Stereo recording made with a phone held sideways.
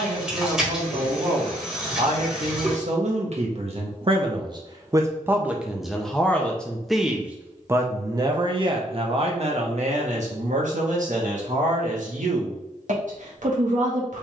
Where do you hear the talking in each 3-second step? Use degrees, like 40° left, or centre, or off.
70° right, 30° right, 20° right, 60° right, 70° right.